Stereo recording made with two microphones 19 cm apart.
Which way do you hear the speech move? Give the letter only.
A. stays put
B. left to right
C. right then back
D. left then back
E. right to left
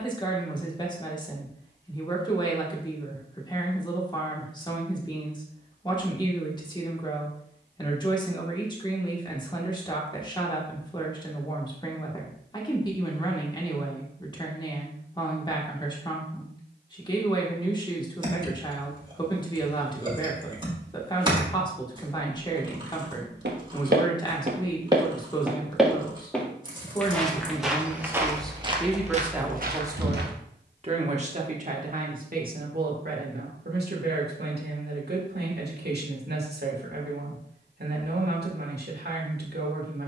B.